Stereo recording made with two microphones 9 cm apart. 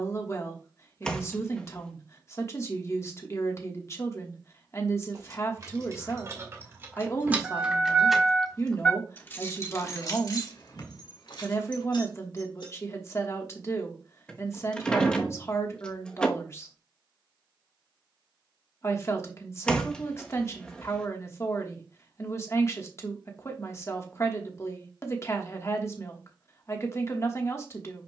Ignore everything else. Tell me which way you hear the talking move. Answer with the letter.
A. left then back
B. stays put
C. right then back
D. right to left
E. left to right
B.